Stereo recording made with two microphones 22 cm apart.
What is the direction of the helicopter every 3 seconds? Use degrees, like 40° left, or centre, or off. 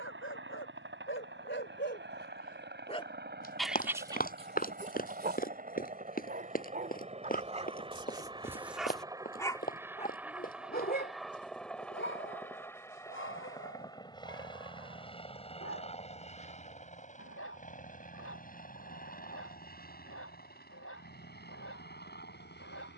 60° right, 40° right, 30° right, centre, 20° left, 30° left, 40° left, 50° left.